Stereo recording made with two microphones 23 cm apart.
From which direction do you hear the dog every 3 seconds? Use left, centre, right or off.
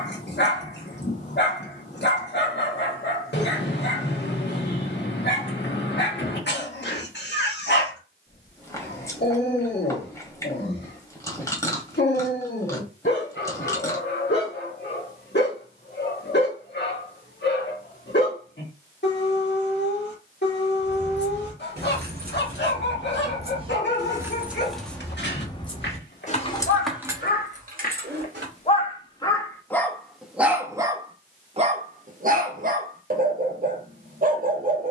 left, left, left, left, left, left, left, left, left, left, right, right.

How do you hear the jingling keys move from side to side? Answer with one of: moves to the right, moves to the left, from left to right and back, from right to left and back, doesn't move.
from right to left and back.